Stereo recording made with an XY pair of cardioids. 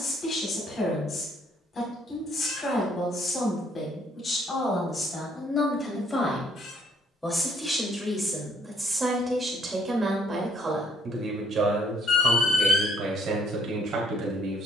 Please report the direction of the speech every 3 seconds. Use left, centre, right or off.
left, left, centre, right, right.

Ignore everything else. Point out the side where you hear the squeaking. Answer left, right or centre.
left.